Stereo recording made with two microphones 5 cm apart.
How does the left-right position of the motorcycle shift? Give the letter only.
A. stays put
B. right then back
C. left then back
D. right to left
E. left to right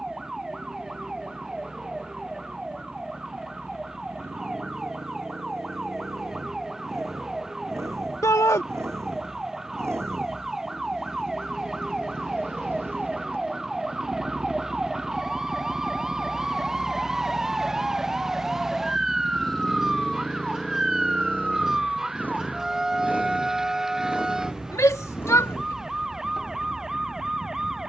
D.